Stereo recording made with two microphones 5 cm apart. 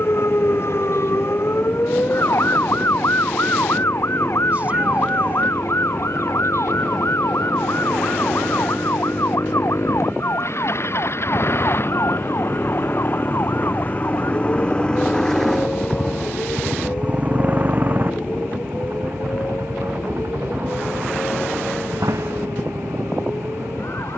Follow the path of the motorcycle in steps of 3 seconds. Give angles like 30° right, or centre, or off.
80° left, 70° left, 70° left, 60° left, 40° left, 10° right, 50° right, 70° right.